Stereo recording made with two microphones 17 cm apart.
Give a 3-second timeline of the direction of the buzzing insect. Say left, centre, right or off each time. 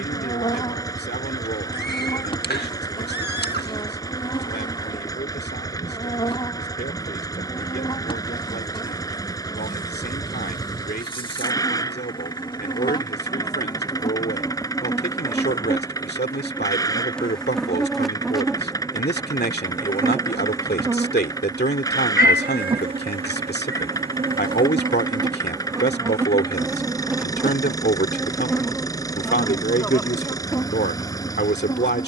left, left, left, left, left, centre, centre, right, right, centre, left.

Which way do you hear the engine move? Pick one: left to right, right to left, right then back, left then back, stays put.
stays put.